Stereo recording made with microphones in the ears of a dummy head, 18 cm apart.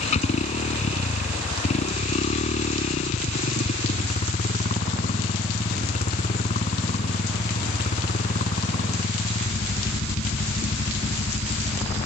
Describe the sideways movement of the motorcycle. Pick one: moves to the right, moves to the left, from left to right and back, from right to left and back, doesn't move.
doesn't move.